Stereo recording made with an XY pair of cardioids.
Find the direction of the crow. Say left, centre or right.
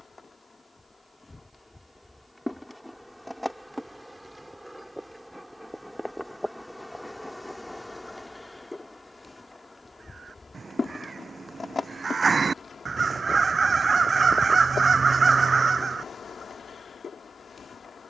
right.